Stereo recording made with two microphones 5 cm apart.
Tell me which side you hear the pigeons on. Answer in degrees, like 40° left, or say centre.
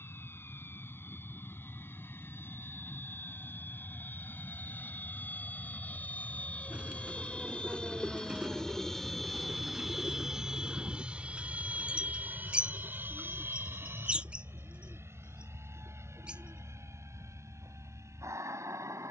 20° right.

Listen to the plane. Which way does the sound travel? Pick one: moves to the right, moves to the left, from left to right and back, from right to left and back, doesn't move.
moves to the right.